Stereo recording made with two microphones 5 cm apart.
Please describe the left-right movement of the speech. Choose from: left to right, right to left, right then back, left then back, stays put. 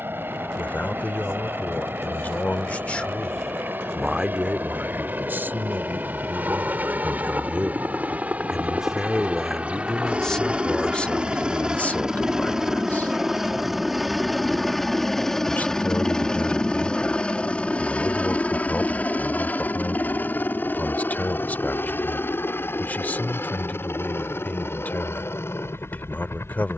right then back.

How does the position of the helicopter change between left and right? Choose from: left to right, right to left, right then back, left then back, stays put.
right to left.